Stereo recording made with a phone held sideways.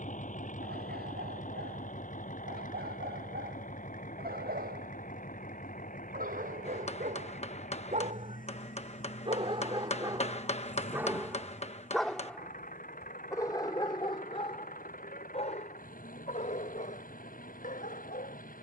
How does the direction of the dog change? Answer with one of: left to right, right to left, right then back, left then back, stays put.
right to left.